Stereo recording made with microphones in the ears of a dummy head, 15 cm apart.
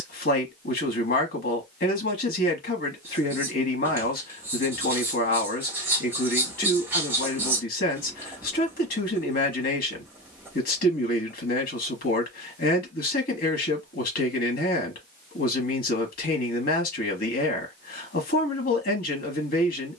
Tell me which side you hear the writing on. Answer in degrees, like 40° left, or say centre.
10° right.